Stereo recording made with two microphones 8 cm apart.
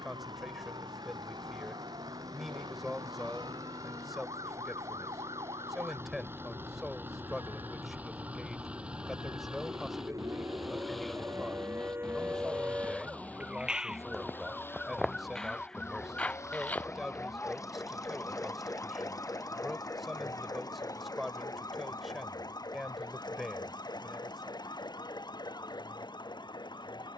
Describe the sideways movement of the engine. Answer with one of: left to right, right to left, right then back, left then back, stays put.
right to left.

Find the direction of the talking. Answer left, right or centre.
centre.